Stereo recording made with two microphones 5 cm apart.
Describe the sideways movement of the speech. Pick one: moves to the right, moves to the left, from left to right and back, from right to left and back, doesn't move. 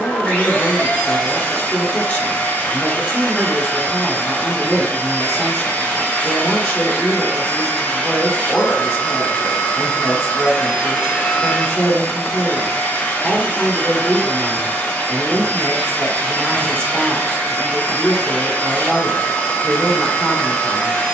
doesn't move.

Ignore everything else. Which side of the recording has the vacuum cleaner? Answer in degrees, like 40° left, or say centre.
30° left.